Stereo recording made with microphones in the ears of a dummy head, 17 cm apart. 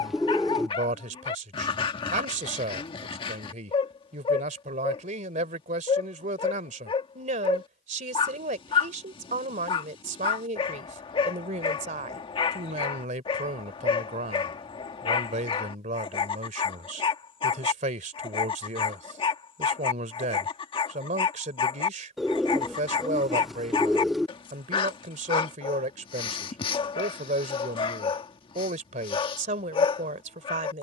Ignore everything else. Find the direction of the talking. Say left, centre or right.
right.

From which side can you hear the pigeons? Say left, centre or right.
centre.